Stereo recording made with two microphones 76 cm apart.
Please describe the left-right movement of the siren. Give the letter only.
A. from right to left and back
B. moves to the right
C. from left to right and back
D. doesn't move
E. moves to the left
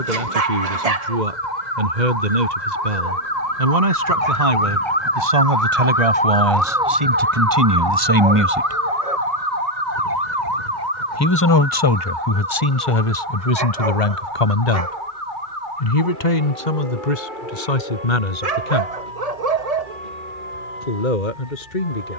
B.